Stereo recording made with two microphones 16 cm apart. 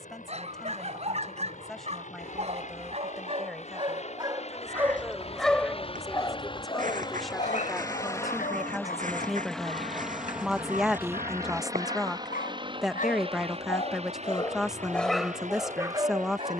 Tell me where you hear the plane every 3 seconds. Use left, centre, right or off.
left, left, left, centre, right, right.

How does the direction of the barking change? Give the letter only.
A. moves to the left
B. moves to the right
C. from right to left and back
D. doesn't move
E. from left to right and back
C.